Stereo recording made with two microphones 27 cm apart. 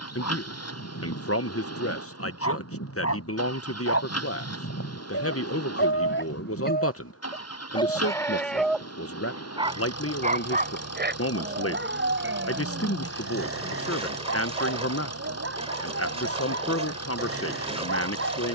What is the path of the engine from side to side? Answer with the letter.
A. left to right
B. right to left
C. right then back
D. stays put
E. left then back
D.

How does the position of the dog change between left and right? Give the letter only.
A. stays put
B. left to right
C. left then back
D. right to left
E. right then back
B.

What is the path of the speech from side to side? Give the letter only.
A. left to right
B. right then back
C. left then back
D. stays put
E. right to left
D.